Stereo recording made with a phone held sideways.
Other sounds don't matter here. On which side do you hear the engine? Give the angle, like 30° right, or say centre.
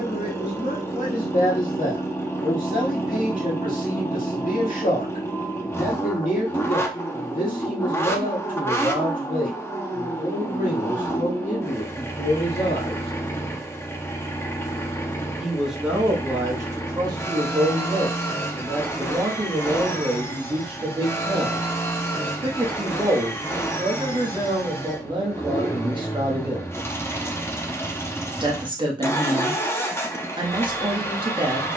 20° left.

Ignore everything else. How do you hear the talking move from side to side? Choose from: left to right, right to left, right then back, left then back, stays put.
left to right.